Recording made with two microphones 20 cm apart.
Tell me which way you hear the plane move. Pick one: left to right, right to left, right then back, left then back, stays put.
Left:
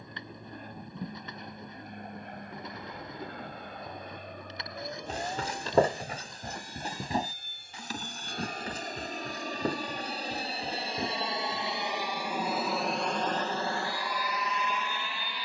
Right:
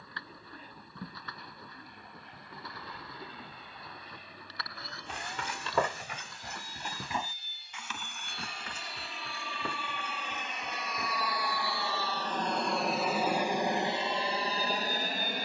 left to right.